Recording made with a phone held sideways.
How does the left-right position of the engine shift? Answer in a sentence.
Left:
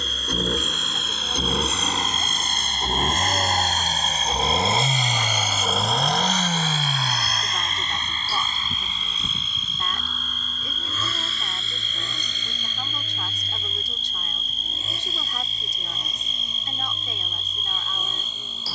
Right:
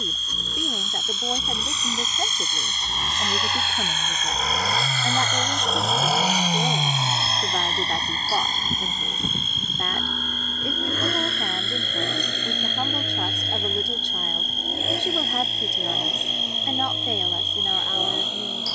In this clip you hear the engine move from left to right.